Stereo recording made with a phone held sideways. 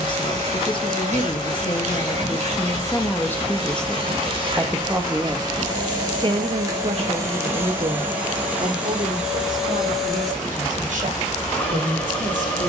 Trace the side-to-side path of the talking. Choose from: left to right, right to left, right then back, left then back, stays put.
left to right.